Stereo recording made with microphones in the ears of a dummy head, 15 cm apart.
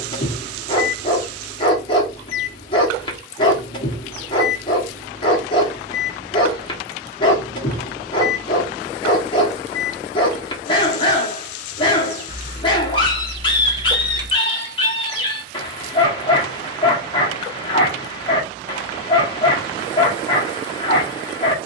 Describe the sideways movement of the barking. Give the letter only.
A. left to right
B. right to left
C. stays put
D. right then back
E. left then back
C.